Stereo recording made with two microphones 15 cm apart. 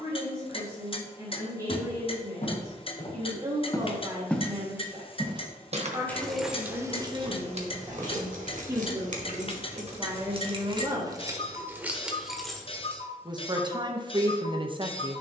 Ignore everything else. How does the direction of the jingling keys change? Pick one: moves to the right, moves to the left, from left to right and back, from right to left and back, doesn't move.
from left to right and back.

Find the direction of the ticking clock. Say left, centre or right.
left.